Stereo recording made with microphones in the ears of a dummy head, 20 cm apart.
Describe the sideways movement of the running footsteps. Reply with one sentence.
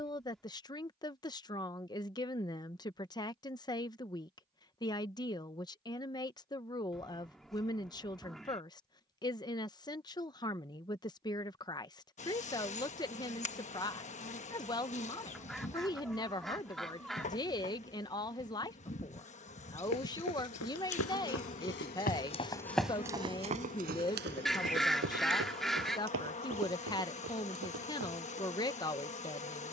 You can hear the running footsteps move to the right.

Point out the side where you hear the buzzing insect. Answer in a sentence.
In this clip you hear the buzzing insect on the left.